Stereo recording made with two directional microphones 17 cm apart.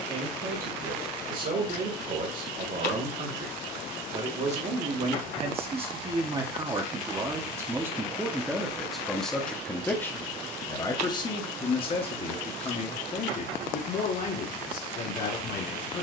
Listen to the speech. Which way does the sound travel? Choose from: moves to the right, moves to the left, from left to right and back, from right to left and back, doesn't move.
moves to the left.